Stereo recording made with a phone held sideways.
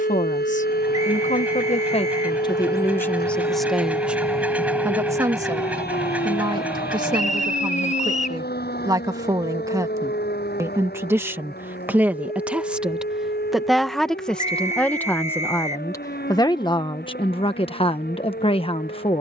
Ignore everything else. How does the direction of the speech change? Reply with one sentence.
You can hear the speech go right and come back.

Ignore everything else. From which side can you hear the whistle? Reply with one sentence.
You can hear the whistle on the left.